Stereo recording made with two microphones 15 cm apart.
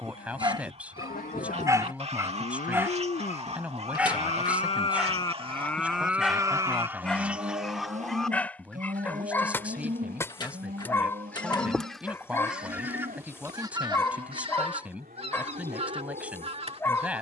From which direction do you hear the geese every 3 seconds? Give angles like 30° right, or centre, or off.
50° right, 40° right, 10° right, 10° left, 20° right, 40° right.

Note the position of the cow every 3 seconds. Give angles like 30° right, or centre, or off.
70° left, 40° left, 40° right, 70° right, 80° right, 80° right.